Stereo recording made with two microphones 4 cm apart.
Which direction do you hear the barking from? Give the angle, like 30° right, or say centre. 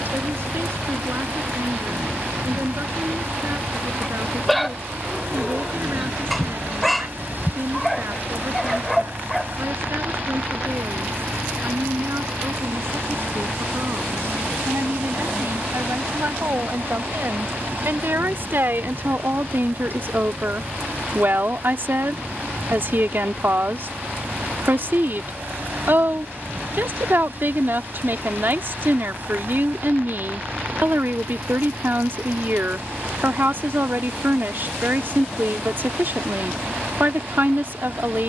centre.